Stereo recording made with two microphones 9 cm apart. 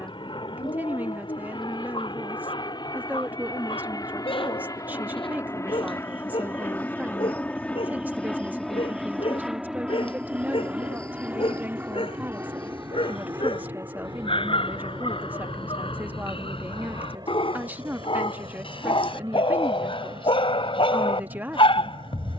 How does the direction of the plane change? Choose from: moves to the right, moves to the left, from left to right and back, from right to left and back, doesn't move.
moves to the right.